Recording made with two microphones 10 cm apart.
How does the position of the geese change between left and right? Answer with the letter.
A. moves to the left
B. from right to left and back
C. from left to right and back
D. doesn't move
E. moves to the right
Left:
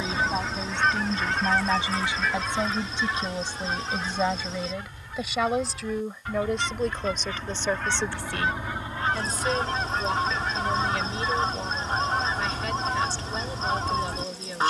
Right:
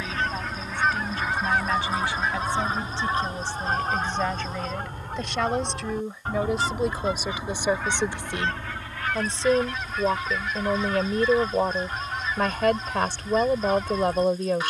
C.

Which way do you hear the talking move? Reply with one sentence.
You can hear the talking move from left to right.